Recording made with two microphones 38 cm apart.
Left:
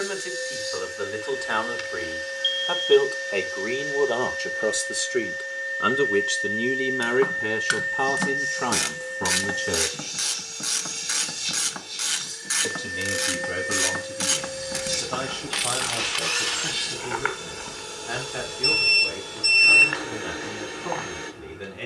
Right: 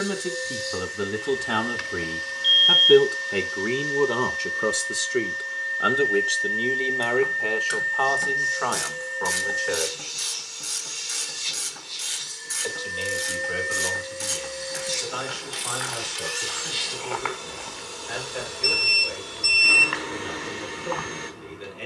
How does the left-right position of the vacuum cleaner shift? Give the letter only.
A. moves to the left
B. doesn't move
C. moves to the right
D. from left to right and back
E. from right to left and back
B.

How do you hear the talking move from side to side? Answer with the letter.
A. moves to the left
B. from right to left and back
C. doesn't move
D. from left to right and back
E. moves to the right
A.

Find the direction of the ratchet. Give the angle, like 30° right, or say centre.
80° left.